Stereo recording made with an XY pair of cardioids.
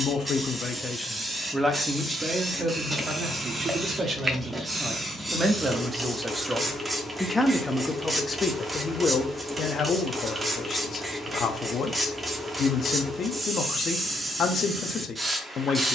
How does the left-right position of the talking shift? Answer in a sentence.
In this clip you hear the talking move from left to right and back again.